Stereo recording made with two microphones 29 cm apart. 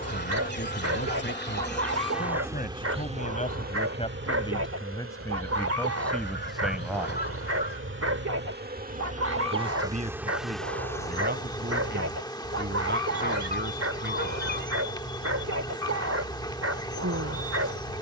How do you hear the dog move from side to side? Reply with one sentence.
In this clip you hear the dog stay put.